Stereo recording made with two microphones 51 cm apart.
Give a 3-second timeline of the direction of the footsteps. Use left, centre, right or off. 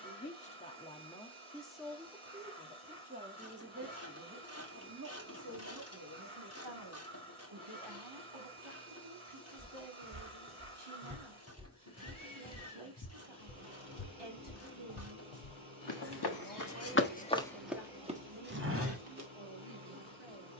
off, off, off, right, left, left, right.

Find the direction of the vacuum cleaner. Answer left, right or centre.
right.